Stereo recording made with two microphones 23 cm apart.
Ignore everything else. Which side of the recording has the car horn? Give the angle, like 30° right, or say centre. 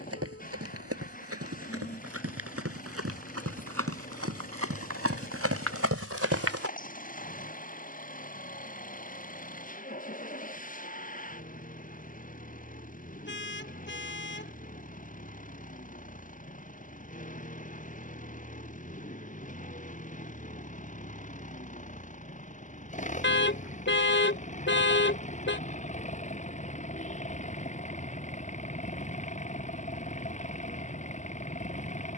50° left.